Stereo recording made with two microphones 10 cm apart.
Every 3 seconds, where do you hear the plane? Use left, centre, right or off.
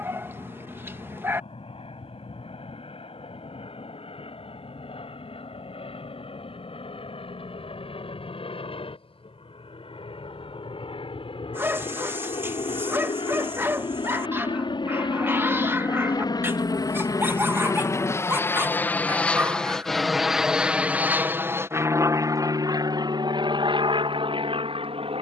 left, left, left, left, left, left, centre, right, right.